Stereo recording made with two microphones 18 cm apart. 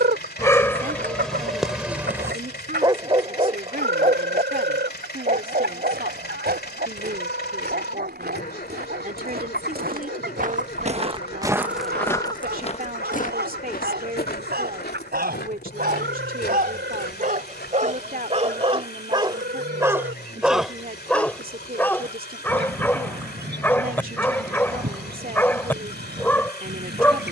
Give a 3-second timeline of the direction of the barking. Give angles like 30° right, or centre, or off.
centre, 50° right, 70° right, 80° right, 80° right, 60° right, 30° right, 10° left, 10° left.